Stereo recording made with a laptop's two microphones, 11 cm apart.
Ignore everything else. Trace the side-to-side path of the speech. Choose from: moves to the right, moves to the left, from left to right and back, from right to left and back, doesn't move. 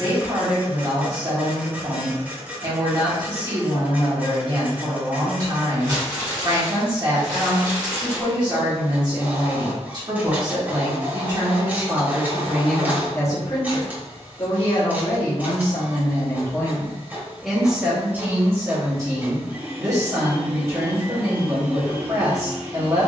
from right to left and back.